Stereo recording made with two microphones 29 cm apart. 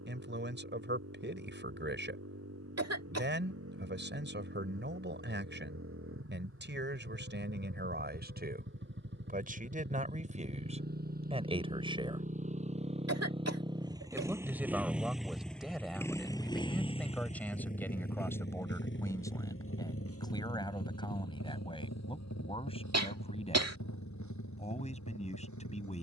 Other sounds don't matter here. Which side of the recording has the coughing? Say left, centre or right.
right.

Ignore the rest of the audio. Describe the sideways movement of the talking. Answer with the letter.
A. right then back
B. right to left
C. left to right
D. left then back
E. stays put
B.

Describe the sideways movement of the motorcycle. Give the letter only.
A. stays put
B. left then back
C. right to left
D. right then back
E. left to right
C.